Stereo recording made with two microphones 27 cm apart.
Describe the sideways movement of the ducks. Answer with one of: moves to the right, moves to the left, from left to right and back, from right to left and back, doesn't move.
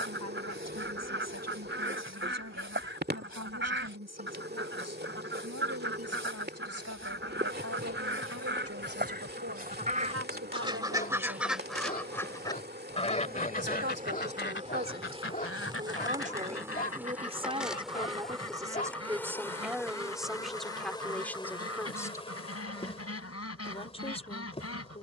moves to the left.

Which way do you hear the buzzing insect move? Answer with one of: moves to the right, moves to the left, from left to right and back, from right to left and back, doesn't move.
moves to the left.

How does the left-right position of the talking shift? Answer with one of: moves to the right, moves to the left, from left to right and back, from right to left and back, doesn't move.
moves to the left.